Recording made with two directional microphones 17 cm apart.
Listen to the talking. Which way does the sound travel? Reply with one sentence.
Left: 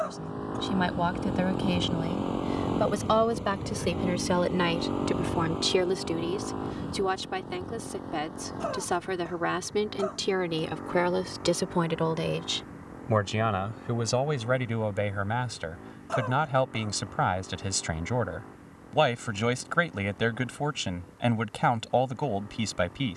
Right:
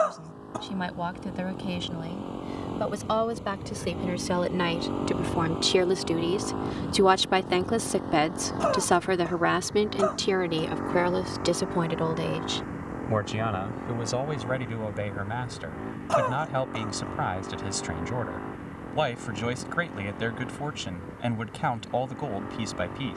In this clip you hear the talking move from left to right and back again.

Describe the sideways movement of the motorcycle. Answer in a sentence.
You can hear the motorcycle go from the left side to the right.